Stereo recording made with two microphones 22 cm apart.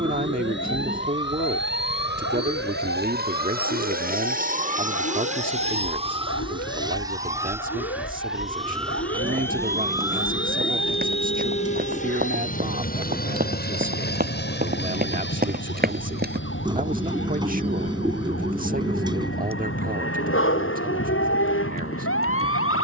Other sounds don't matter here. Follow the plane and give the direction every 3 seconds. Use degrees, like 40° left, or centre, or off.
60° right, 40° right, 10° right, 20° left, 40° left, 50° left, 60° left, 60° left.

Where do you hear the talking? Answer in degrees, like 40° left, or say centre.
40° right.